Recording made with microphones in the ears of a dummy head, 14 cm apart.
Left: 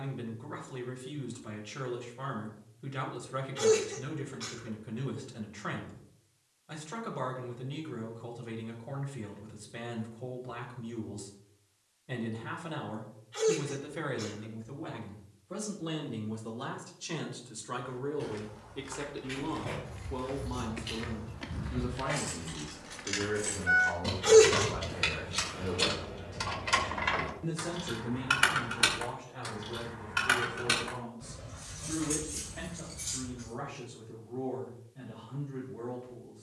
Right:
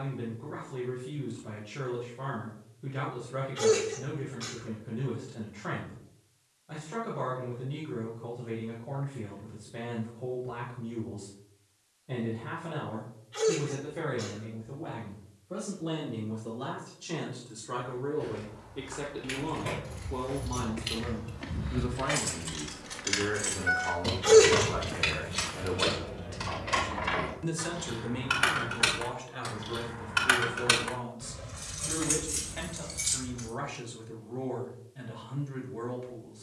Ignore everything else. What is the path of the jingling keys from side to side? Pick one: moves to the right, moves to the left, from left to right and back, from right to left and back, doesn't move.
from right to left and back.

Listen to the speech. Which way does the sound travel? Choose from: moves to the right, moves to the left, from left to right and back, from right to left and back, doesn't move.
moves to the right.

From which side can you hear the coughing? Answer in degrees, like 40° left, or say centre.
10° left.